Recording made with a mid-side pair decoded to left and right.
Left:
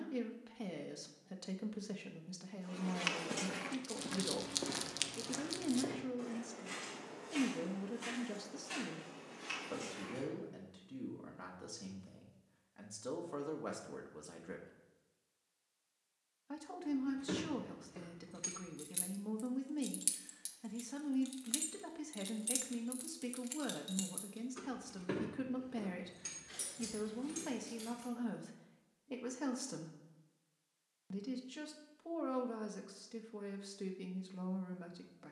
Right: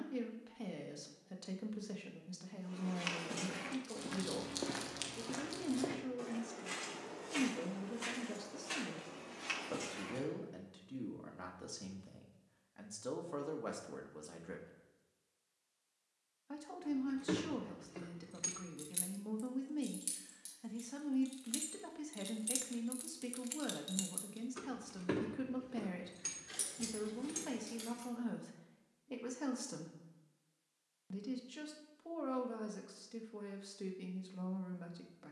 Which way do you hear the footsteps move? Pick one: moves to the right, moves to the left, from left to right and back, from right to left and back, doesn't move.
moves to the right.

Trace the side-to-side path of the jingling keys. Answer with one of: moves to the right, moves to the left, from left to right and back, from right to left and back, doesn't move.
from right to left and back.